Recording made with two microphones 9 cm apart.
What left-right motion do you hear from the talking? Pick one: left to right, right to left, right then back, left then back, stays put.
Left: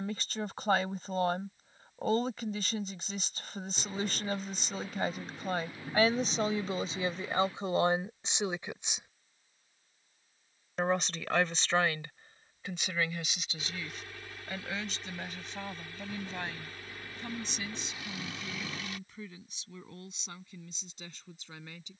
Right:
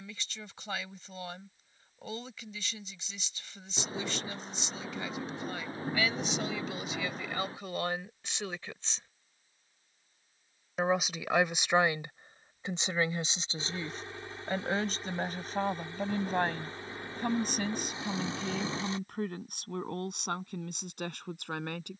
left to right.